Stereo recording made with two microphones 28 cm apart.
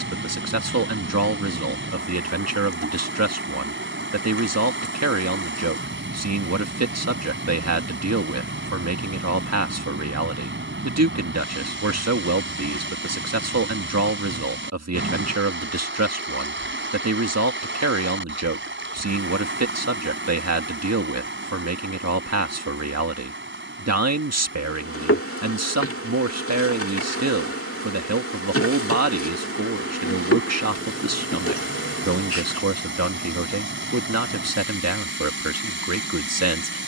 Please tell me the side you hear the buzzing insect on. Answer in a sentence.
In this clip you hear the buzzing insect on the left.